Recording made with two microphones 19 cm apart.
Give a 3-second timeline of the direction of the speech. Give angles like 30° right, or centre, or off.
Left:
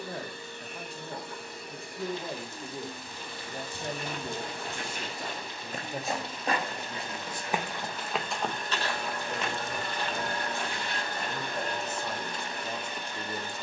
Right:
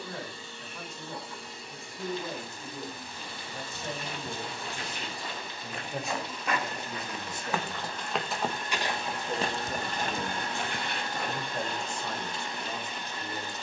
30° left, 30° left, 20° right, 20° right, 20° left.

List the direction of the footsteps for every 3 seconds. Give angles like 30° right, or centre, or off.
off, 50° left, 10° left, 50° right, off.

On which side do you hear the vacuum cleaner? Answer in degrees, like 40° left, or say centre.
60° left.